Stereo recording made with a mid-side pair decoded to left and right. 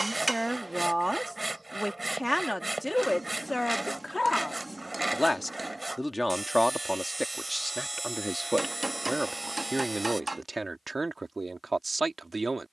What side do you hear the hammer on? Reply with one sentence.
You can hear the hammer on the right.